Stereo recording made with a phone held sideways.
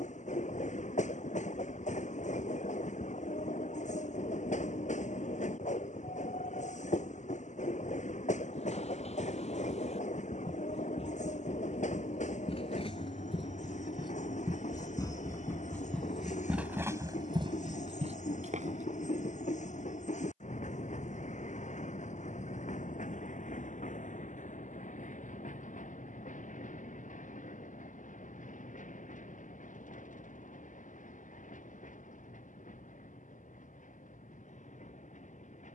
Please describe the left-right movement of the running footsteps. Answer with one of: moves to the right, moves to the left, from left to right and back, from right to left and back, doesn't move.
moves to the right.